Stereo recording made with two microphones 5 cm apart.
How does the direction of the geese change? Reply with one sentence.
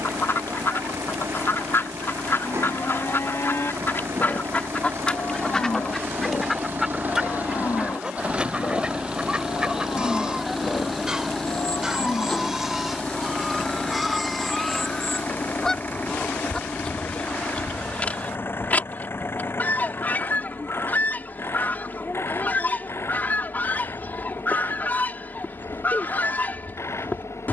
You can hear the geese move from left to right and back again.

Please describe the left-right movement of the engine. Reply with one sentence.
In this clip you hear the engine move from right to left.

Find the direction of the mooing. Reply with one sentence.
In this clip you hear the mooing on the left.